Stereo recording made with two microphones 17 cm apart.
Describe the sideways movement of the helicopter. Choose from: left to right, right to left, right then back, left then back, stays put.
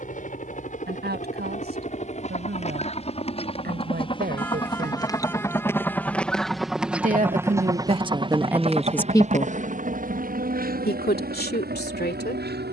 left to right.